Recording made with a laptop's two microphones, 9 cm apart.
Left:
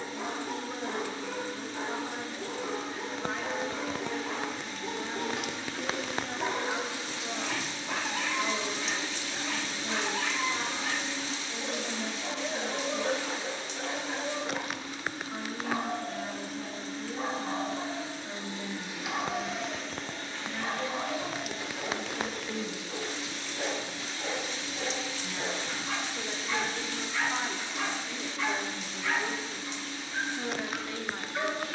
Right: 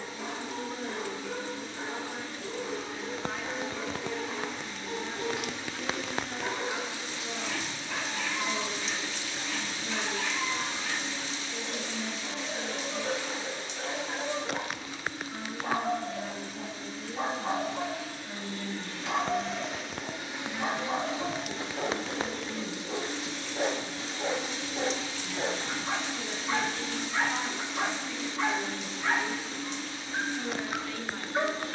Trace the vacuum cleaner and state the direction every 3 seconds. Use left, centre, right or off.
left, left, left, left, left, left, centre, right, right, right, right.